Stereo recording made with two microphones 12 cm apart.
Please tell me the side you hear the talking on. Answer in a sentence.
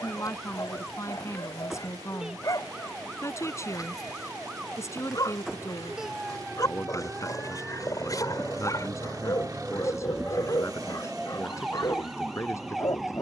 You can hear the talking on the left.